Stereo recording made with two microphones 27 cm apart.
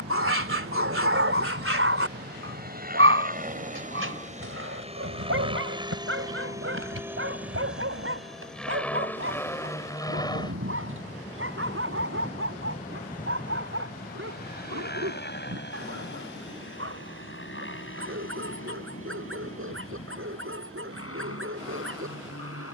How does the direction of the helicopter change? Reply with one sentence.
You can hear the helicopter go from the right side to the left.